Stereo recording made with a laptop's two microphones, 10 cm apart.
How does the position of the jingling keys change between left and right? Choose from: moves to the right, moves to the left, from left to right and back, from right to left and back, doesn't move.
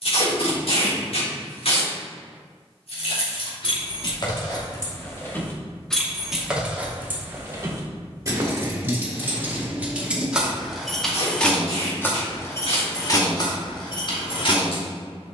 from left to right and back.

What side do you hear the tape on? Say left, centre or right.
left.